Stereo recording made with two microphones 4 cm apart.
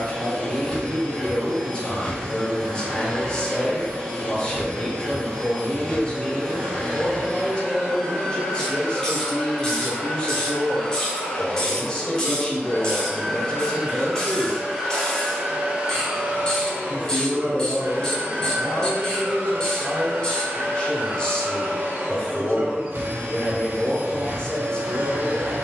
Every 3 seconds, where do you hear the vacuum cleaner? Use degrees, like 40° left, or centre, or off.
20° left, 20° left, 20° left, 20° left, centre, 40° right, 70° right, 70° right, 70° right.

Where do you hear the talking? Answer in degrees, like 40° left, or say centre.
30° left.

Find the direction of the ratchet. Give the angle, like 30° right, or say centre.
20° left.